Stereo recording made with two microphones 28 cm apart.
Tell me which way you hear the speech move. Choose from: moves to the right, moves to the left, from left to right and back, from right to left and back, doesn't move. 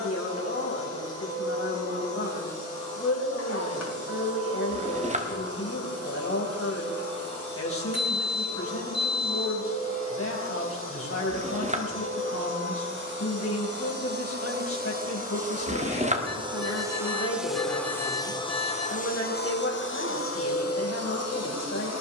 doesn't move.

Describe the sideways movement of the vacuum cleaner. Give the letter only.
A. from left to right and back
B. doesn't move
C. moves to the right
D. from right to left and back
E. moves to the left
E.